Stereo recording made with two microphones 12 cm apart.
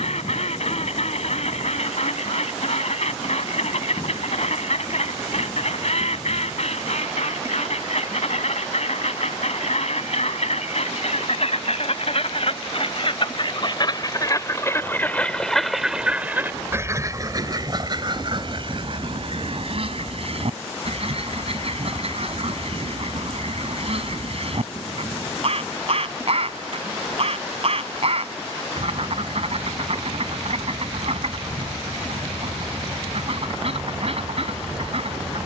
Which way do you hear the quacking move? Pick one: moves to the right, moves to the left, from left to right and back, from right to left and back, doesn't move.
moves to the right.